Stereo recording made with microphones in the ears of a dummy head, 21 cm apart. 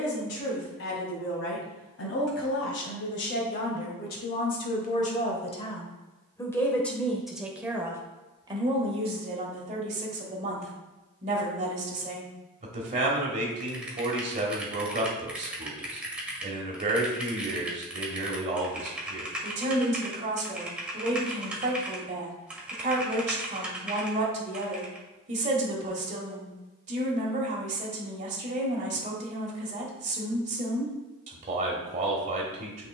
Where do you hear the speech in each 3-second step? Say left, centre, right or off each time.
left, left, centre, right, right, right, right, right, right, right, right.